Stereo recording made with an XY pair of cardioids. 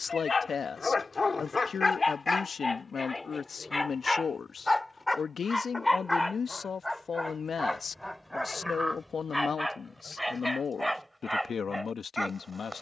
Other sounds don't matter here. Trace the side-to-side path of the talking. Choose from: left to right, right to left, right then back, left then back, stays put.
stays put.